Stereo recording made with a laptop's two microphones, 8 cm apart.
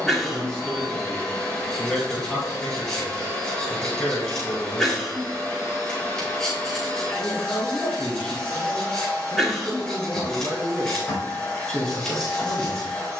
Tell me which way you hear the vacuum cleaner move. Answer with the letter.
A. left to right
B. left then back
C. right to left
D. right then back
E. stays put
E.